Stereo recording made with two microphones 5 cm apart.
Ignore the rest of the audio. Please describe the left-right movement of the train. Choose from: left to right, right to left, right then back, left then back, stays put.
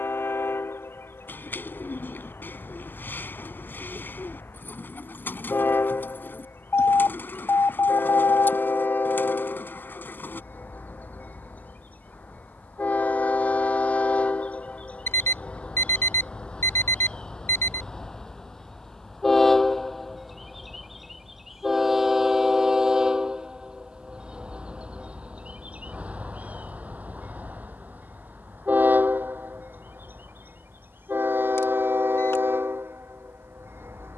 left to right.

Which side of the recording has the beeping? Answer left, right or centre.
left.